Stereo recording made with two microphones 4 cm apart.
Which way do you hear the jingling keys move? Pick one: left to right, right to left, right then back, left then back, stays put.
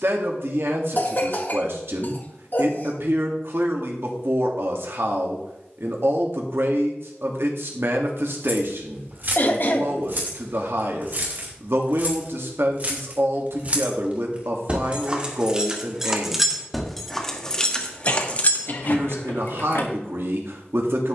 right to left.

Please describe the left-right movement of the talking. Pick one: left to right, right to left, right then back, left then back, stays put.
stays put.